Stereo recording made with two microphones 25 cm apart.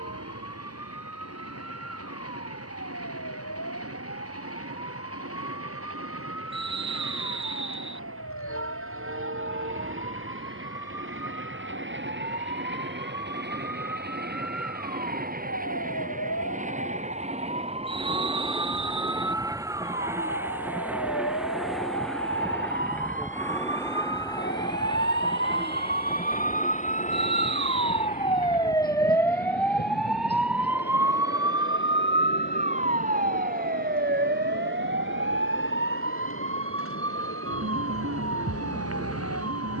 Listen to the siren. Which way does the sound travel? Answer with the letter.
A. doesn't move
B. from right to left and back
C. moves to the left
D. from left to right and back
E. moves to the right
E.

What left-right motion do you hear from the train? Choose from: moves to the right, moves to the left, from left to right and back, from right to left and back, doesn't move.
moves to the left.